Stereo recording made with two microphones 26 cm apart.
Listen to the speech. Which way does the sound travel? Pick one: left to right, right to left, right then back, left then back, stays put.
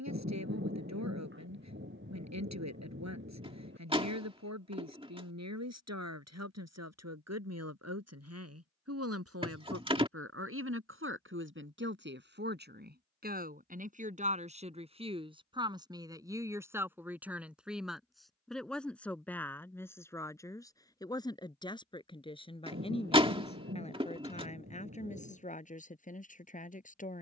right to left.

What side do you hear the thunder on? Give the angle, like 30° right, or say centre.
40° right.